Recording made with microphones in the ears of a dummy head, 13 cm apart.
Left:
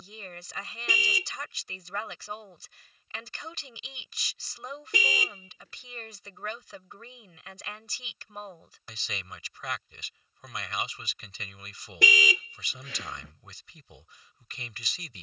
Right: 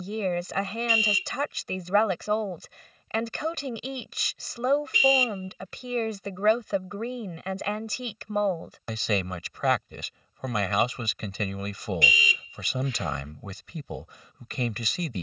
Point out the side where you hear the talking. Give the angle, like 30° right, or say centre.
50° right.